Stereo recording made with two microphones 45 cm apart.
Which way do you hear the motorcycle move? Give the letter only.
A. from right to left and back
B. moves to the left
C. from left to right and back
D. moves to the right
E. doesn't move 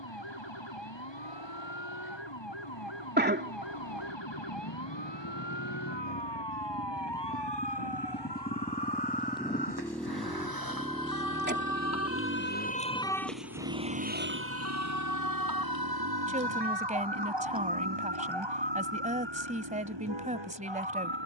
D.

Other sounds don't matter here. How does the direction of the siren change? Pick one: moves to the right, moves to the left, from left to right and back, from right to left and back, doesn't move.
moves to the right.